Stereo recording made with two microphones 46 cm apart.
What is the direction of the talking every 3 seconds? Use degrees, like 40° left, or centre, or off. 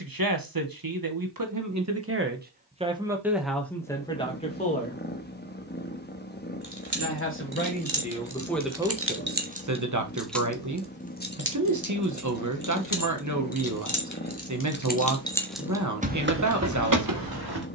40° right, 10° left, 10° left, 40° right, 40° right, 40° right.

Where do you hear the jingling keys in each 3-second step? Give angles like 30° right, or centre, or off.
off, off, 50° right, centre, 40° left, 30° right.